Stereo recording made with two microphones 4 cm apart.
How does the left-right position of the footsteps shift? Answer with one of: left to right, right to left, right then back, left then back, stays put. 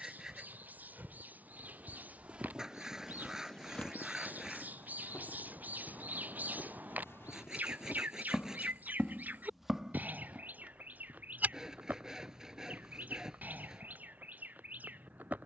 left then back.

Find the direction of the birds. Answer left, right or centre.
right.